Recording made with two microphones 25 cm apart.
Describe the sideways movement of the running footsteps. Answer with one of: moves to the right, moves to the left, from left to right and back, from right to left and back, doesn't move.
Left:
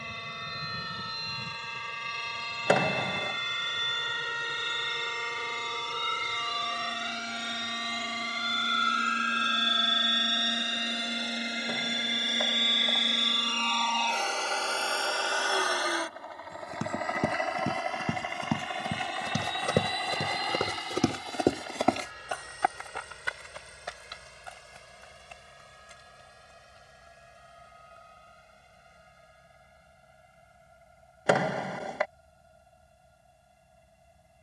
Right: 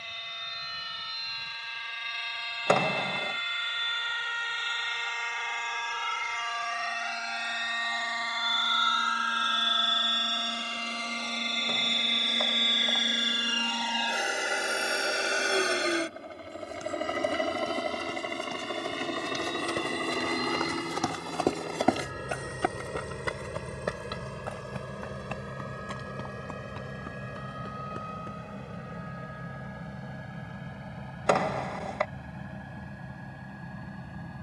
moves to the right.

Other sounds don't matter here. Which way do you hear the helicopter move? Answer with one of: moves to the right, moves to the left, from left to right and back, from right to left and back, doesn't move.
moves to the right.